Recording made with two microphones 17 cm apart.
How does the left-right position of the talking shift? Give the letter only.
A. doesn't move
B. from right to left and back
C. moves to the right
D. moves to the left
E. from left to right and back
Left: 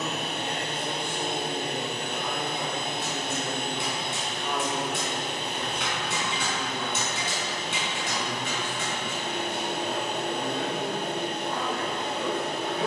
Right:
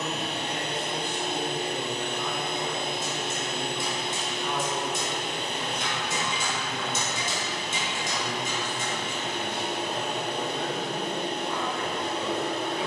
A.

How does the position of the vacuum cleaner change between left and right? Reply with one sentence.
In this clip you hear the vacuum cleaner stay put.